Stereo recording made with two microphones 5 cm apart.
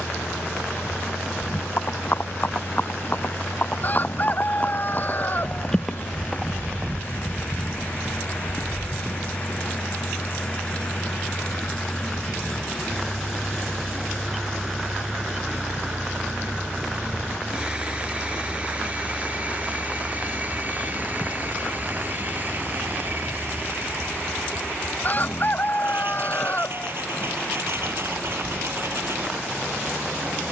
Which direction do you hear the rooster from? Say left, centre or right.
left.